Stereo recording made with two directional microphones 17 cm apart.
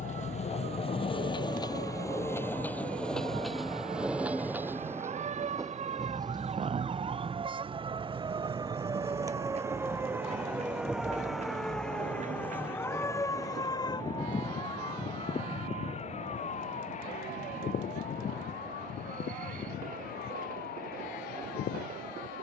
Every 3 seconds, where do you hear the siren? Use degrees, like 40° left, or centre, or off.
60° right, 50° right, 30° right, 10° right, 20° left, 40° left, 60° left, 60° left.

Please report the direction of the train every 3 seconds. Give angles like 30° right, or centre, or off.
30° left, 10° right, 30° right, 40° right, 40° right, 50° right, 50° right, 50° right.